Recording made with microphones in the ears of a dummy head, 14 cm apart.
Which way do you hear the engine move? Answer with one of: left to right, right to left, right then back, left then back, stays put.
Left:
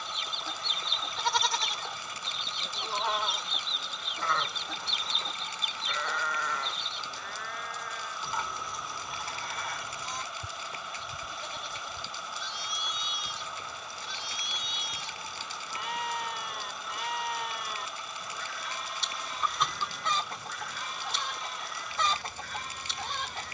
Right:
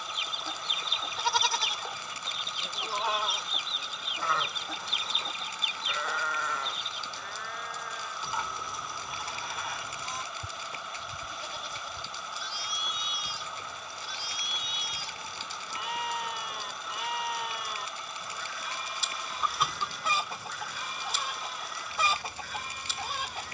stays put.